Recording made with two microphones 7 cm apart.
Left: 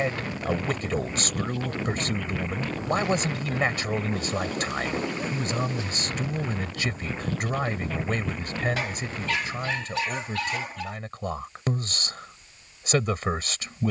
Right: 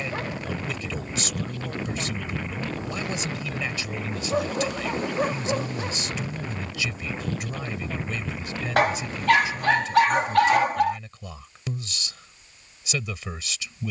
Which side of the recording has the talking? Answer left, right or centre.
left.